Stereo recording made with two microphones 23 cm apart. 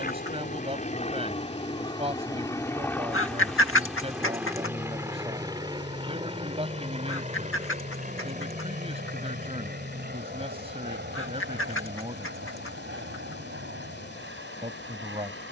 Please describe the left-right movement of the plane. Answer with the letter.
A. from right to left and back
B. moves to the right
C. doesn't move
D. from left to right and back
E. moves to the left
B.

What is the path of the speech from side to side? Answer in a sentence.
In this clip you hear the speech stay put.